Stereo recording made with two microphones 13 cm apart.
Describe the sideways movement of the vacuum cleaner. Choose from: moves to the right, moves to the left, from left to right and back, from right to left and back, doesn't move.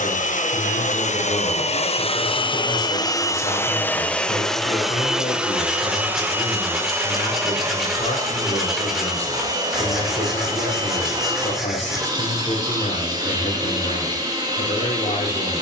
moves to the right.